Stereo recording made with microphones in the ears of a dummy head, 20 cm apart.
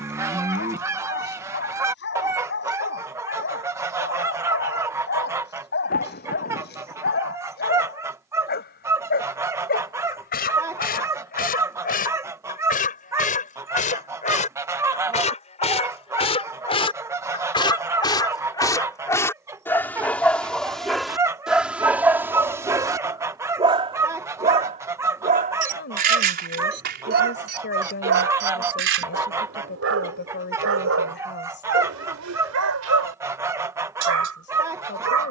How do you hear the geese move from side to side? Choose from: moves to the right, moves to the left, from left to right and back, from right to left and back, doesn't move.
doesn't move.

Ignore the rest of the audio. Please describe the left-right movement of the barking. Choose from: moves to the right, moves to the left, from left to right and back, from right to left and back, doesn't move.
moves to the right.